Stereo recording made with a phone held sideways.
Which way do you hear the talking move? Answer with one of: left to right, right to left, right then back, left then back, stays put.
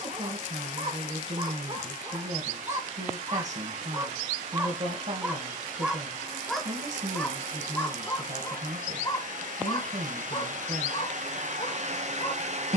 stays put.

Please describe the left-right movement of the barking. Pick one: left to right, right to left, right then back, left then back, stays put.
right to left.